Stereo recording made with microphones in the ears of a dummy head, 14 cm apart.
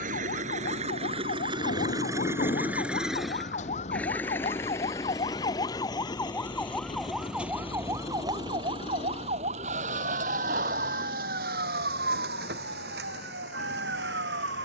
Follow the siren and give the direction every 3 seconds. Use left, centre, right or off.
left, left, centre, right, right.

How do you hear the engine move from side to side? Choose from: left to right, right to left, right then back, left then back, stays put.
right to left.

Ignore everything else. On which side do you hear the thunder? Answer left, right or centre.
left.